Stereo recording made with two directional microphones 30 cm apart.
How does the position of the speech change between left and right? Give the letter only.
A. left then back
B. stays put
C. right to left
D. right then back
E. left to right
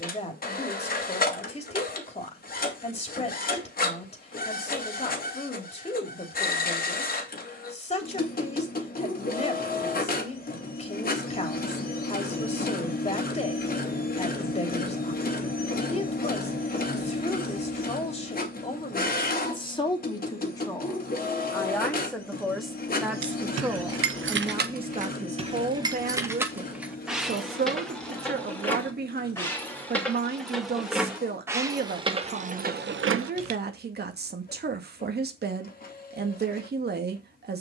E.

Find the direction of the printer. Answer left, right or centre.
left.